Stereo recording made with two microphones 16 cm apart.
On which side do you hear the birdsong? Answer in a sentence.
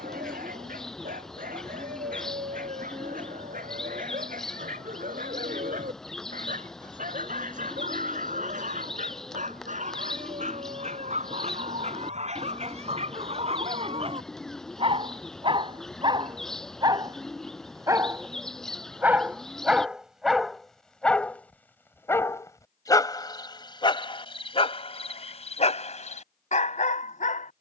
You can hear the birdsong in the centre.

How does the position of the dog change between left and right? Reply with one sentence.
In this clip you hear the dog move to the left.